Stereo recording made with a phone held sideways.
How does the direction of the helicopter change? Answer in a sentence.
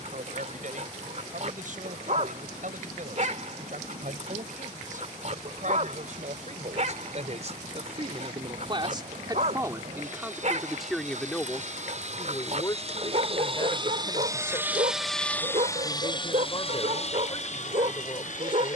You can hear the helicopter travel towards the left.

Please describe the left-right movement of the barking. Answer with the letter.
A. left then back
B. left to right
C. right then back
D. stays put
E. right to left
D.